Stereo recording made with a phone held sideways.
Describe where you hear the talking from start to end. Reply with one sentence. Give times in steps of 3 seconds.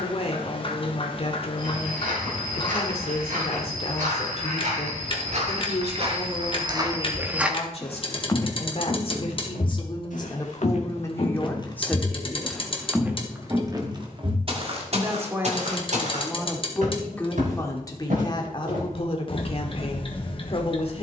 You can hear the talking on the left from 0 s, in the centre from 12 s and on the left from 18 s.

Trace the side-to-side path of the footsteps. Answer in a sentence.
In this clip you hear the footsteps go left and come back.